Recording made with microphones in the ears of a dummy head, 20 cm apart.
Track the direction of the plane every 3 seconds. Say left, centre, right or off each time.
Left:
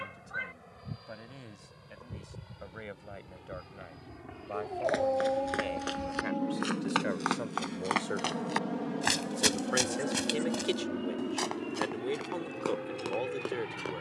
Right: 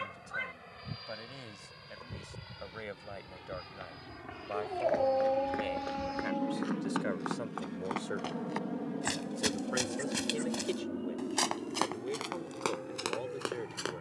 right, right, centre, left, left.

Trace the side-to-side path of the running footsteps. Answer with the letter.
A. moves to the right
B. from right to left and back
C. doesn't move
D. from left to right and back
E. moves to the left
A.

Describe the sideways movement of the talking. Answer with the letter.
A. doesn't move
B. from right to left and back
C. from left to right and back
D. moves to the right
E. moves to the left
E.